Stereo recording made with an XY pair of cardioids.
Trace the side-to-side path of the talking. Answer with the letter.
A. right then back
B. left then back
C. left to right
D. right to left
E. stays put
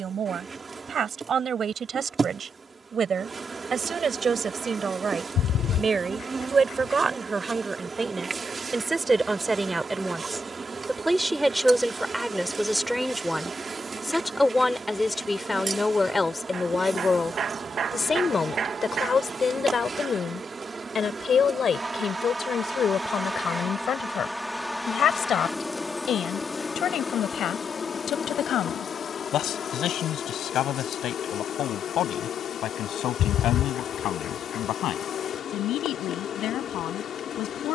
D.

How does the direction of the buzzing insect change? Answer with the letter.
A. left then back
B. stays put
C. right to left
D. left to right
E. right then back
C.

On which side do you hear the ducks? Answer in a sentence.
In this clip you hear the ducks on the left.